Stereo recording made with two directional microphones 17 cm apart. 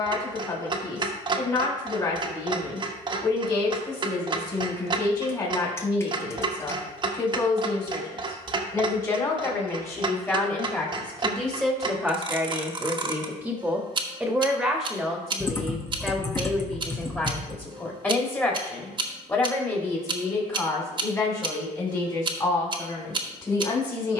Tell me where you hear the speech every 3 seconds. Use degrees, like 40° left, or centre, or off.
20° left, 20° left, 20° left, 10° left, 10° right, 10° left, 20° left, 20° left.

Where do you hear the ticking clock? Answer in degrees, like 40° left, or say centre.
30° right.